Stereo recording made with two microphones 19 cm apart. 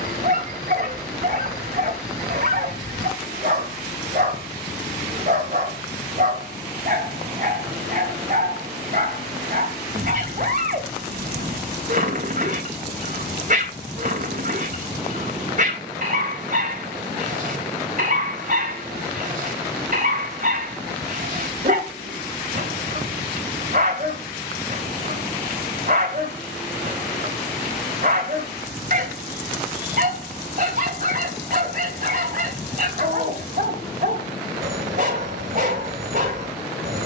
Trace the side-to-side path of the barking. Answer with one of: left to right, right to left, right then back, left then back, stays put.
stays put.